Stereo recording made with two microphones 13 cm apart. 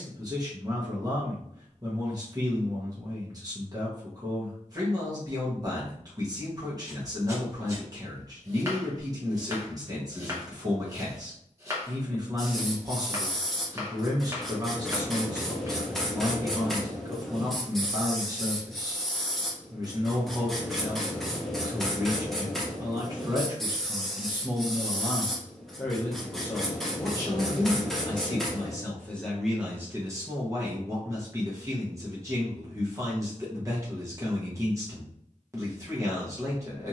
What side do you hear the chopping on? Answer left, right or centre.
right.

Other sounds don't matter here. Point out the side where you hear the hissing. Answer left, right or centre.
centre.